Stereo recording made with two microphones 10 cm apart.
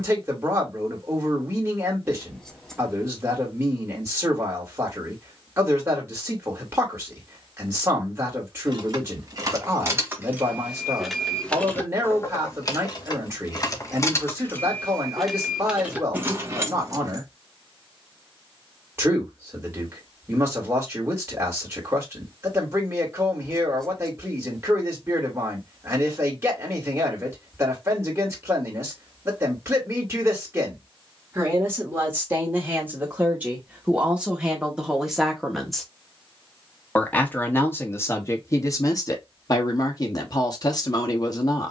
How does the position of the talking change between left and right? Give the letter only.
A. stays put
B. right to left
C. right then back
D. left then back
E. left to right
B.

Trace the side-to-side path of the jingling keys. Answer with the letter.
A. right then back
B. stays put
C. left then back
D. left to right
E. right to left
C.